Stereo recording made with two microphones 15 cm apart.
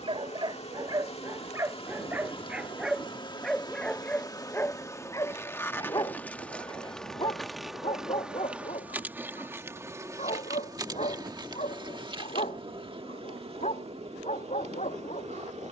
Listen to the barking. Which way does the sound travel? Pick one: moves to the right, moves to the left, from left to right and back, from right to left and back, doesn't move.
moves to the left.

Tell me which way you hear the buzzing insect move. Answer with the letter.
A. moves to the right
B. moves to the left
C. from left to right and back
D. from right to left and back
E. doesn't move
A.